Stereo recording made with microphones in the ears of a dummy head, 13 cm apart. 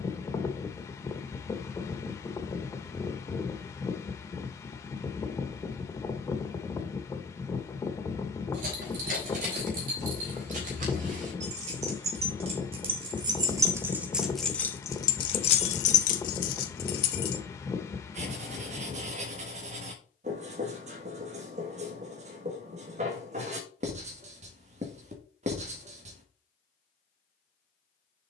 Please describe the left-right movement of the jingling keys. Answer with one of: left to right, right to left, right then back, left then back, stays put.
right to left.